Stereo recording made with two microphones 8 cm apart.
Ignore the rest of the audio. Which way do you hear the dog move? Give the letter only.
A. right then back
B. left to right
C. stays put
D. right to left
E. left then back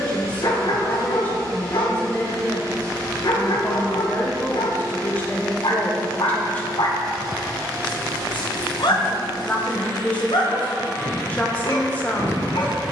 C.